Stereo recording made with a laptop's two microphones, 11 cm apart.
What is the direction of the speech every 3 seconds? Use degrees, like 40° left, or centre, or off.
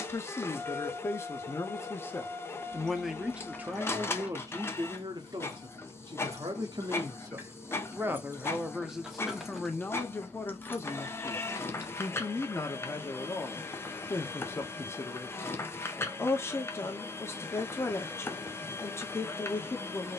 20° left, 30° right, 30° right, 20° left, 20° left, 20° left, 20° left.